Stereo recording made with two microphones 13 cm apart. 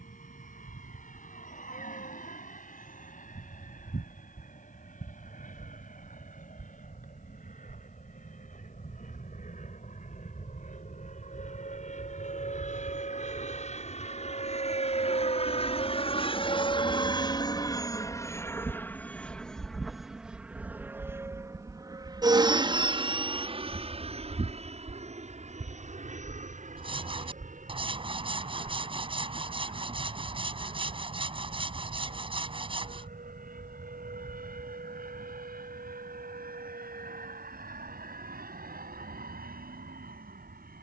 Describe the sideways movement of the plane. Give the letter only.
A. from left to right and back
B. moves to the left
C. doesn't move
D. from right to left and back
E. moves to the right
E.